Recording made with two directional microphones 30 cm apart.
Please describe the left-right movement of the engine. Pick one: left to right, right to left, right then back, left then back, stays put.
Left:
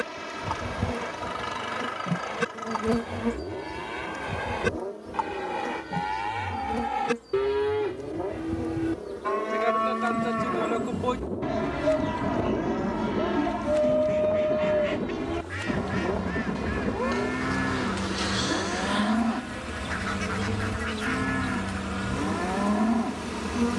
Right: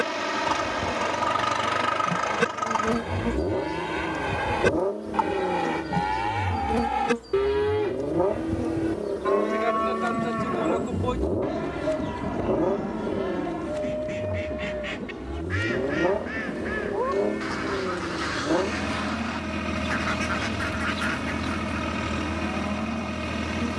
stays put.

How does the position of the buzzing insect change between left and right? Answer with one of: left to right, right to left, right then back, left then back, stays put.
right then back.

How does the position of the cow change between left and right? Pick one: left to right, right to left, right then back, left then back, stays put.
right to left.